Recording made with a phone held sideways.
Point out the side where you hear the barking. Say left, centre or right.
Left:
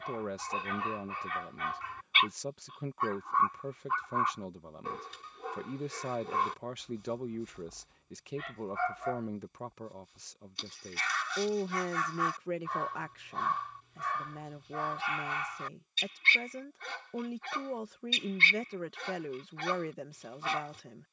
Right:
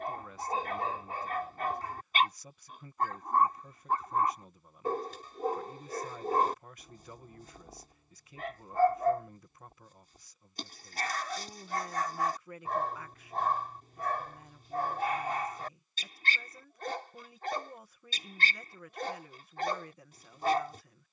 right.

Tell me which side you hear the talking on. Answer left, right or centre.
left.